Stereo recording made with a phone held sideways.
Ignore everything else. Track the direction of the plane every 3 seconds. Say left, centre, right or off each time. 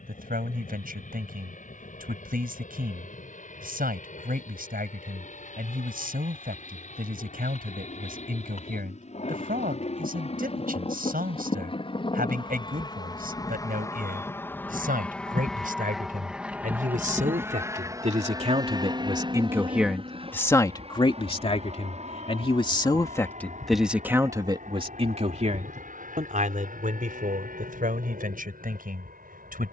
left, left, left, left, left, centre, right, right, right, right.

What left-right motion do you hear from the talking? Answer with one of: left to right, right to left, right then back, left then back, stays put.
left then back.